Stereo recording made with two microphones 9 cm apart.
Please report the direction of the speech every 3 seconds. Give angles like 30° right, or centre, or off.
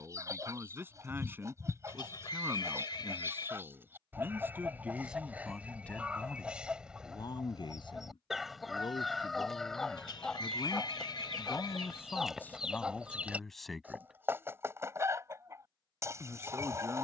30° right, 10° right, 50° left, 50° left, 10° left, 20° right.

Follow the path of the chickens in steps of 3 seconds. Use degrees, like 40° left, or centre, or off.
30° right, 20° right, 10° right, centre, 20° right, 30° right.